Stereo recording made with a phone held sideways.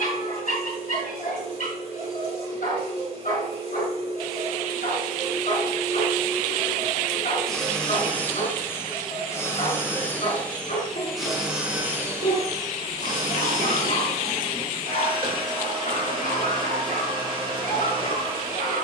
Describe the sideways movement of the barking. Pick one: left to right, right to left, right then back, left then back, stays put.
stays put.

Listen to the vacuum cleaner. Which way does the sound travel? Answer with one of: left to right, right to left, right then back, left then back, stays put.
left then back.